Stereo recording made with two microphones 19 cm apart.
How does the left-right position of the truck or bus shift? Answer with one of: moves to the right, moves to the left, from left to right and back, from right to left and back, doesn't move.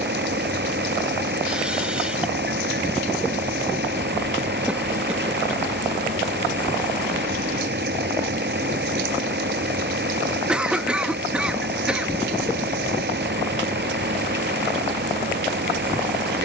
doesn't move.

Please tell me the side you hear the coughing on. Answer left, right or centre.
centre.